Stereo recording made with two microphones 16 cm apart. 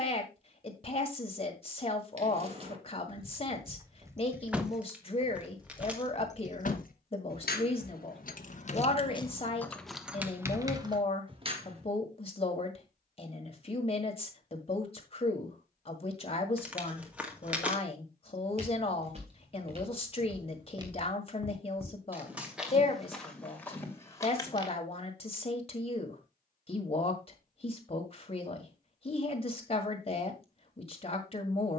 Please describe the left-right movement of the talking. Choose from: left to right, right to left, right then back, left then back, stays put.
stays put.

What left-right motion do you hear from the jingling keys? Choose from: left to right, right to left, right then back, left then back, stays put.
left then back.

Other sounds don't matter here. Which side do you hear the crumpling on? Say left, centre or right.
centre.